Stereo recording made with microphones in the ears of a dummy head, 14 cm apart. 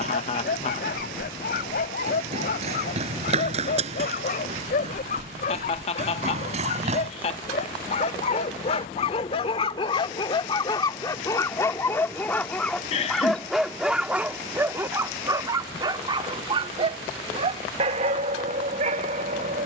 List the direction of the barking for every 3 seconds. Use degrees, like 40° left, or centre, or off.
60° left, 60° left, 50° left, 30° left, centre, 30° right, 50° right.